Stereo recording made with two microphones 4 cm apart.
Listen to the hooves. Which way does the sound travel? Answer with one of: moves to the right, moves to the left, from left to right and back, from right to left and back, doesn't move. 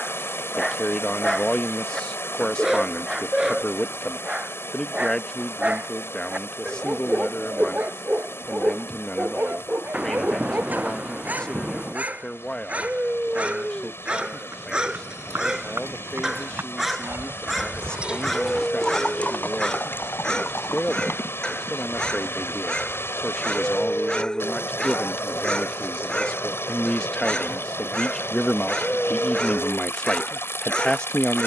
moves to the left.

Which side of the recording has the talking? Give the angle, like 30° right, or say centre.
20° left.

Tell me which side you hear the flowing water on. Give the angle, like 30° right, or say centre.
80° left.